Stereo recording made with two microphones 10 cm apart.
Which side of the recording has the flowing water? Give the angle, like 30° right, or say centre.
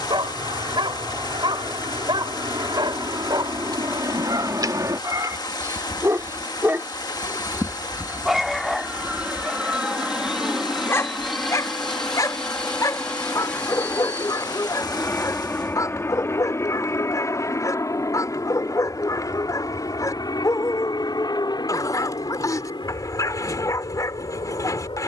40° left.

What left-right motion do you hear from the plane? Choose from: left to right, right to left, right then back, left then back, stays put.
right to left.